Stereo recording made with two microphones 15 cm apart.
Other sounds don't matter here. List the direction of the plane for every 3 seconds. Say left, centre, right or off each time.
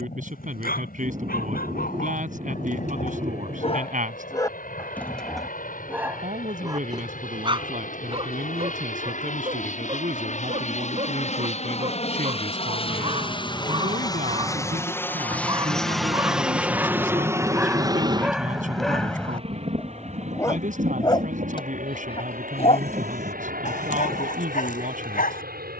left, left, left, left, left, centre, right, right, right.